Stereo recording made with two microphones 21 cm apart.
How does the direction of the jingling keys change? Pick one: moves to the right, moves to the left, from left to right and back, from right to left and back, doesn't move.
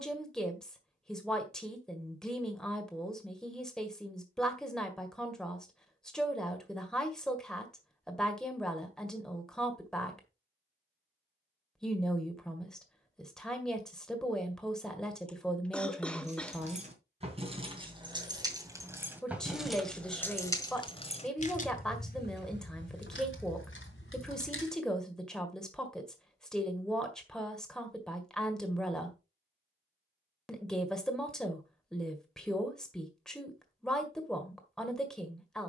moves to the left.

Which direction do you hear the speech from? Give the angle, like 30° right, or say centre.
centre.